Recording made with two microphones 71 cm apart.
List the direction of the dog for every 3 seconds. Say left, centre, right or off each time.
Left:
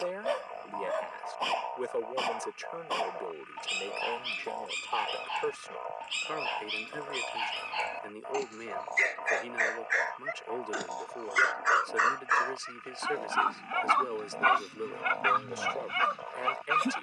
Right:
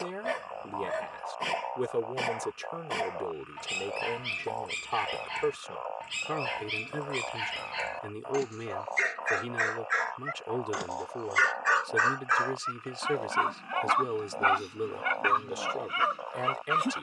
right, right, right, right, centre, left.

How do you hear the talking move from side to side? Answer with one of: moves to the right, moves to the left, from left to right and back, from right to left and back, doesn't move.
doesn't move.